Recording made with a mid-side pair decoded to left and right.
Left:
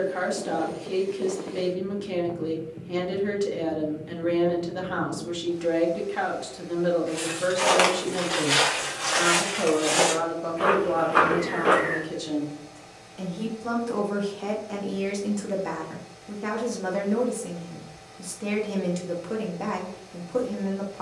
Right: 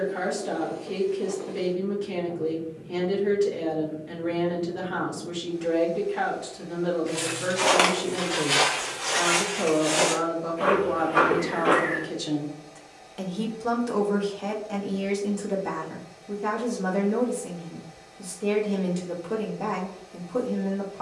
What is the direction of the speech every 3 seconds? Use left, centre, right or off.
left, left, left, centre, centre, left, left.